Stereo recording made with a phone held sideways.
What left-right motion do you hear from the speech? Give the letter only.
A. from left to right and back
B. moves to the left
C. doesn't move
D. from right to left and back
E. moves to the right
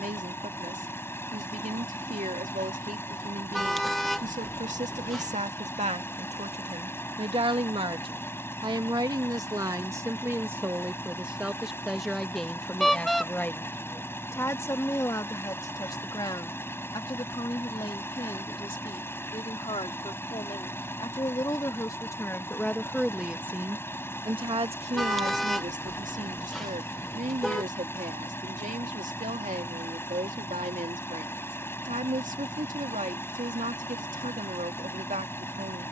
D.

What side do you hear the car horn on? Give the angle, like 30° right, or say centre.
centre.